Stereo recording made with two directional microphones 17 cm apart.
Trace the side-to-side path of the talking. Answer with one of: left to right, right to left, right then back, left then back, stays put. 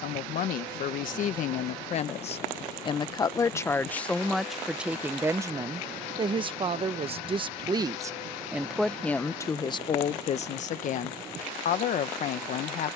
right then back.